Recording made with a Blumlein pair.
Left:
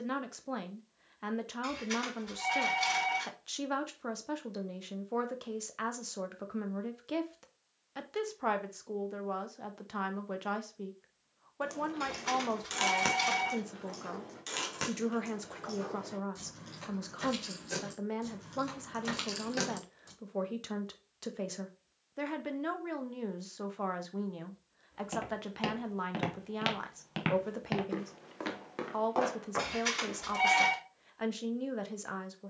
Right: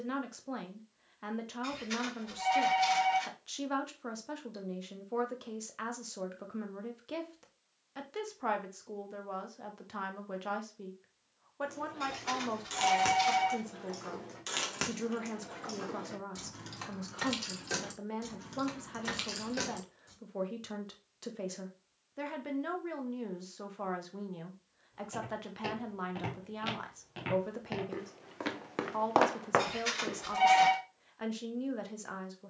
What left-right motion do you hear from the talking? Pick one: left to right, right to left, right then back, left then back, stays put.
stays put.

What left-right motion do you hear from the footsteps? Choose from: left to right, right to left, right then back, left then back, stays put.
left to right.